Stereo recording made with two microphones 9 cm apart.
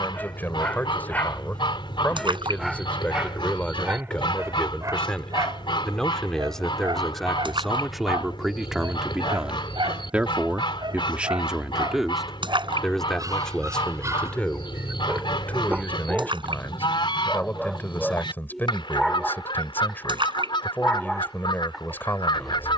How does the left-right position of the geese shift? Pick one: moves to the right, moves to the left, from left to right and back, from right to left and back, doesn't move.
doesn't move.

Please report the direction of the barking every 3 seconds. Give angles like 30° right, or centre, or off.
10° left, 30° right, 60° right, 50° right, 40° right, 10° right, centre, centre.